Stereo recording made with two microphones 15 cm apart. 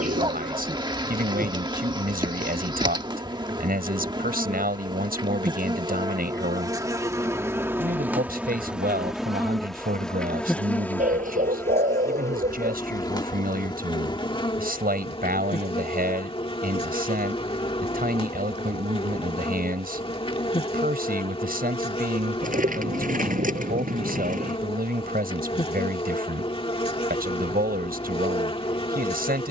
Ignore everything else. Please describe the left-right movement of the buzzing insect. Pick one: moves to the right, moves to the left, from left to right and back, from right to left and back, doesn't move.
moves to the left.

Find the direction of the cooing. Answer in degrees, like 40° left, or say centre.
60° right.